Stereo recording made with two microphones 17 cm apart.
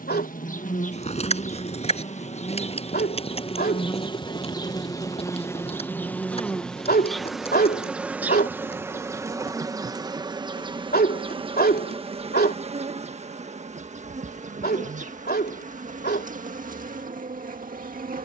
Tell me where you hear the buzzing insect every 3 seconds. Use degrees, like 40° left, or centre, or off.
40° left, 20° left, centre, 30° right, 40° right, 50° right.